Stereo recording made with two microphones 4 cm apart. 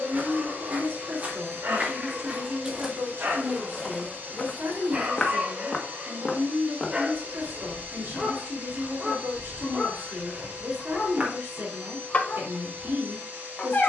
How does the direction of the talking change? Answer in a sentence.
You can hear the talking stay put.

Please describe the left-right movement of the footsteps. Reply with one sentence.
In this clip you hear the footsteps move from right to left and back again.